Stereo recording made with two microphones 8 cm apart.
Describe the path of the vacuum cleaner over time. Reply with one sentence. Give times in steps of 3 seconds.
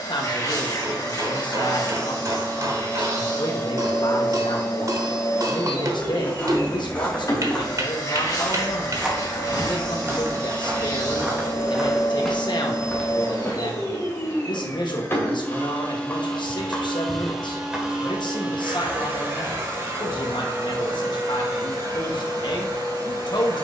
You can hear the vacuum cleaner on the left from 0 s, in the centre from 15 s and on the right from 18 s.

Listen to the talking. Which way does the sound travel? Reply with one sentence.
You can hear the talking stay in one place.